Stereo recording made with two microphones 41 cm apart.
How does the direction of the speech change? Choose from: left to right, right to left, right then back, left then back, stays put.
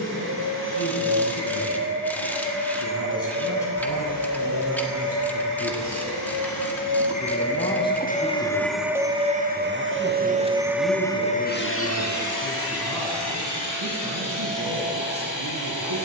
left to right.